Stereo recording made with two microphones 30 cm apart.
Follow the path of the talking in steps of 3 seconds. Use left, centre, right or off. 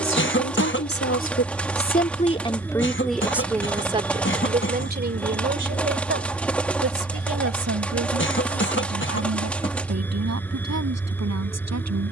left, right, right, right.